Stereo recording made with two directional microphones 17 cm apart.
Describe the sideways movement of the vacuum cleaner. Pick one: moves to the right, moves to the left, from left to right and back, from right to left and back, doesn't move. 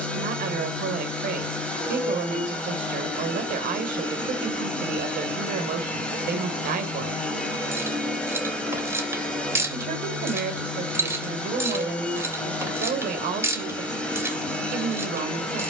doesn't move.